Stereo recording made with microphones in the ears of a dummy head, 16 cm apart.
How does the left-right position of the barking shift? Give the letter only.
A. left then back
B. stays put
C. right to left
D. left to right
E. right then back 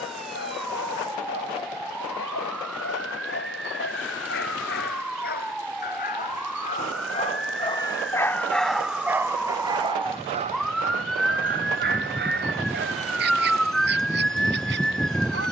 D.